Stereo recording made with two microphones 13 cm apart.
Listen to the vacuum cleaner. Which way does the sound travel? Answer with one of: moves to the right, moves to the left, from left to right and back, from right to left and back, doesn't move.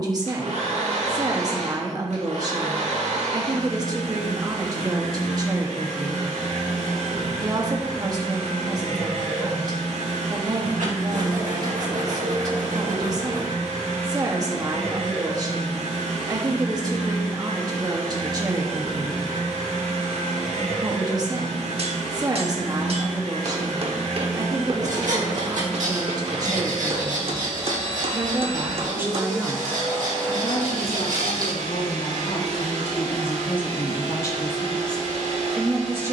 doesn't move.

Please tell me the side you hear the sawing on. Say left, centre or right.
right.